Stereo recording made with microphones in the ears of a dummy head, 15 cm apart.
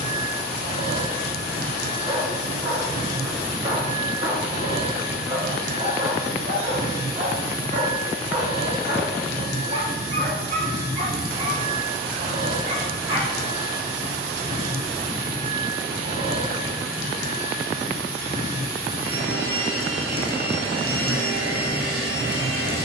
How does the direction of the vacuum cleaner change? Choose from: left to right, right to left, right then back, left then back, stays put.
stays put.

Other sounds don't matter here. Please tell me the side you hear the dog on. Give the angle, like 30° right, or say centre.
40° right.